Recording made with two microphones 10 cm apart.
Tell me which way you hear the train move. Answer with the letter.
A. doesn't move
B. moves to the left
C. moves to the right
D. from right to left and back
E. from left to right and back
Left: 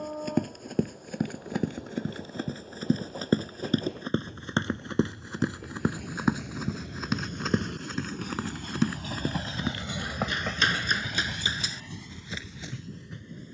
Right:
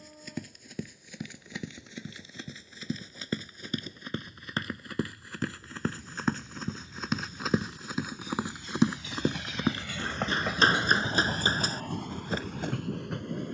C.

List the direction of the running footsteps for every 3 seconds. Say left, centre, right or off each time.
left, left, centre, right, right.